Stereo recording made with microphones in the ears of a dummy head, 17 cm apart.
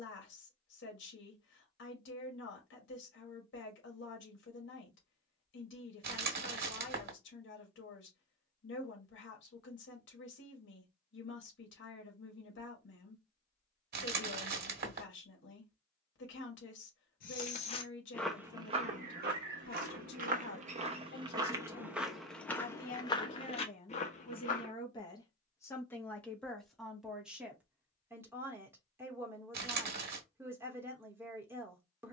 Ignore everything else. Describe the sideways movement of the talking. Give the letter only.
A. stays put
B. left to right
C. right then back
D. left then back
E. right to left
B.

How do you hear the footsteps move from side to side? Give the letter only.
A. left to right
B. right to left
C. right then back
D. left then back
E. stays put
C.